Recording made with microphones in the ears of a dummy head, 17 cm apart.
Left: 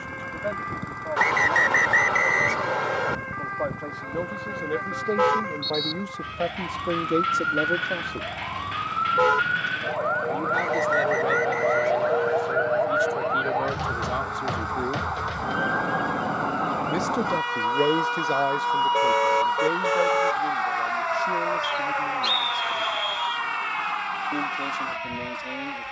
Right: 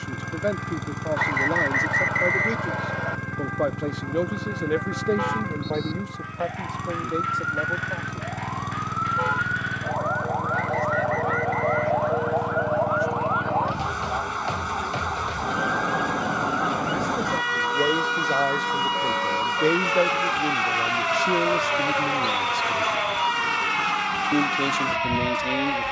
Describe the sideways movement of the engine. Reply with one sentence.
In this clip you hear the engine stay put.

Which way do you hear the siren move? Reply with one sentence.
In this clip you hear the siren travel towards the right.